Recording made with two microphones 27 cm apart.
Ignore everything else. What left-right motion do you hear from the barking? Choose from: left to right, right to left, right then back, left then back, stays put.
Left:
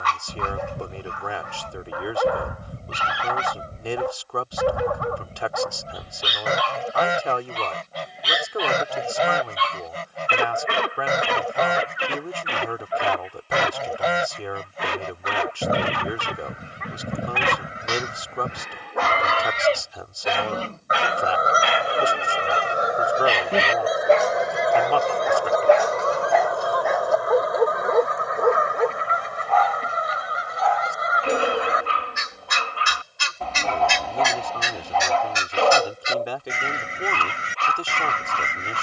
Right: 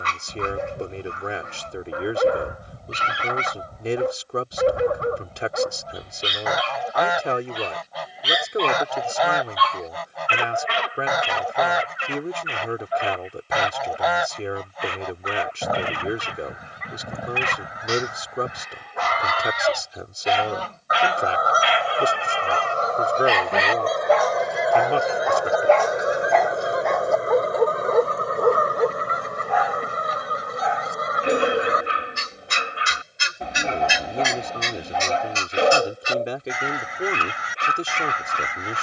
left then back.